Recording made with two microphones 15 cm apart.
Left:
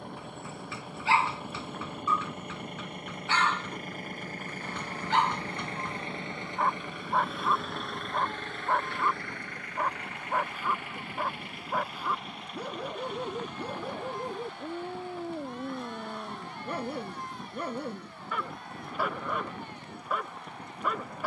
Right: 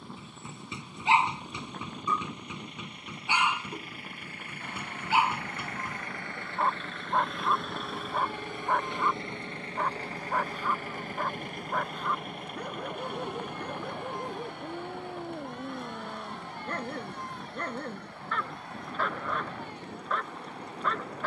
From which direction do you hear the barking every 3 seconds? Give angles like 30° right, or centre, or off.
20° right, 10° right, centre, centre, 10° left, 10° left, 10° left.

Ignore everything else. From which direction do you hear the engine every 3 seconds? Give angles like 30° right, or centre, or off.
60° left, 40° left, centre, 40° right, 60° right, 70° right, 70° right.